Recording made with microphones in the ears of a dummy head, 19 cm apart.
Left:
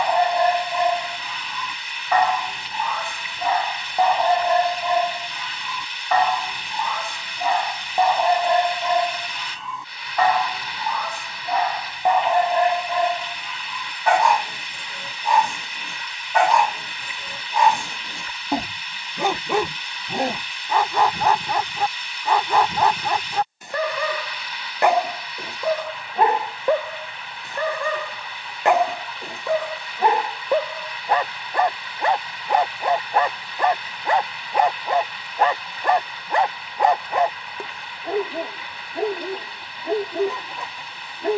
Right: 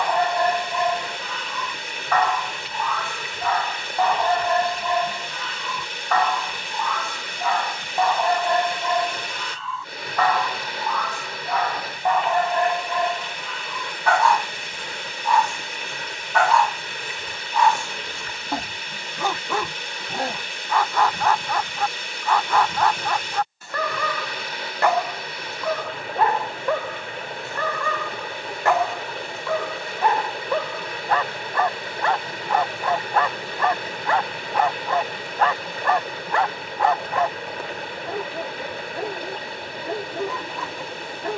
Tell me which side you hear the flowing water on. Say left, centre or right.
right.